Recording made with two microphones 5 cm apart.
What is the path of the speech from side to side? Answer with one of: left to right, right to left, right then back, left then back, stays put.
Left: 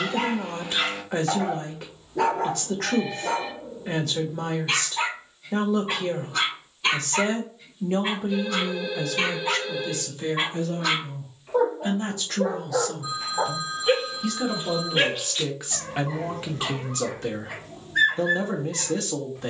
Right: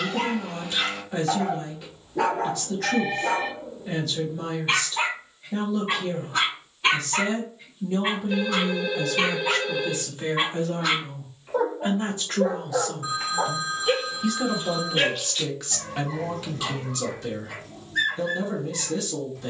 right then back.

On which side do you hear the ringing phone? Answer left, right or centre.
right.